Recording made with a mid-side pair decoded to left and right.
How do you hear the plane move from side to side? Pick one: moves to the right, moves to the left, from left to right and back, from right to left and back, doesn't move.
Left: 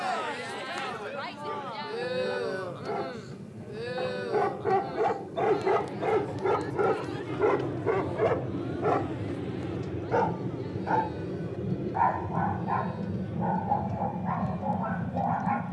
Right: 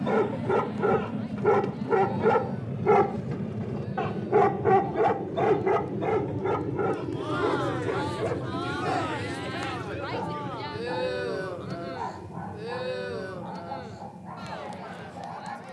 moves to the left.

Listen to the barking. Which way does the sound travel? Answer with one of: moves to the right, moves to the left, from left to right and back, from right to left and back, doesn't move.
moves to the left.